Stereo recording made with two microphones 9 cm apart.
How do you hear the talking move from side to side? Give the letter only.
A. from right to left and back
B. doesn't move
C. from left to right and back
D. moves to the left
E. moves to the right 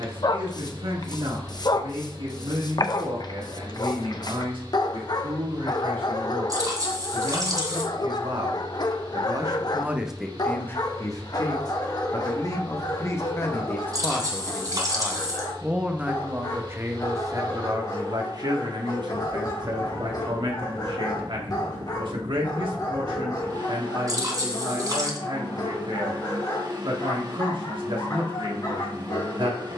A.